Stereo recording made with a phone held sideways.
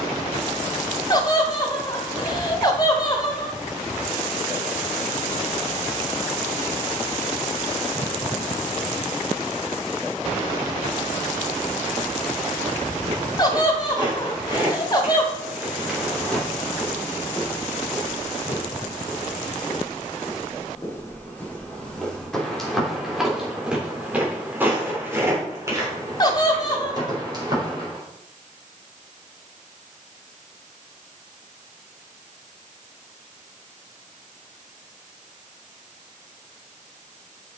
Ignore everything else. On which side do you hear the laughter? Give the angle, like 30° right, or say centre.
30° left.